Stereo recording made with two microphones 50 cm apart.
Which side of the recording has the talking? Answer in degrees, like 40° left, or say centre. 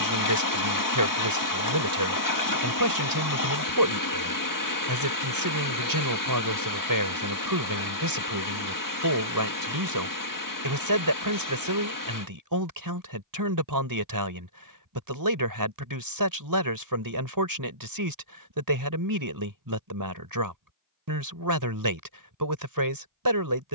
40° right.